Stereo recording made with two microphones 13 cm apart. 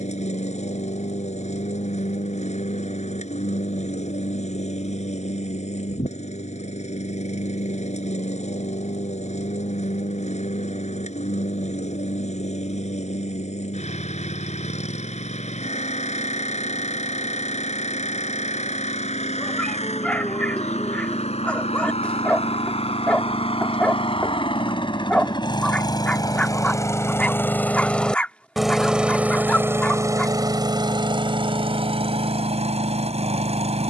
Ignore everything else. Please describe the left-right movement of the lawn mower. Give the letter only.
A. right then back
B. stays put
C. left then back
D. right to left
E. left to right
E.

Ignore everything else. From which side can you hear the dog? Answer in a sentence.
You can hear the dog in the centre.